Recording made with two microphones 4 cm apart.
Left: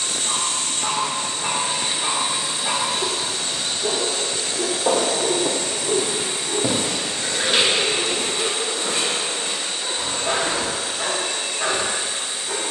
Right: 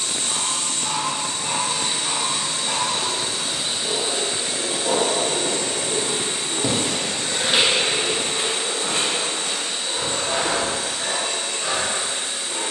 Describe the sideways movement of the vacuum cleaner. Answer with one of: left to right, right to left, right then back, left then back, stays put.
left to right.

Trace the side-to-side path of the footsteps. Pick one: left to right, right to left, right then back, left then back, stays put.
left to right.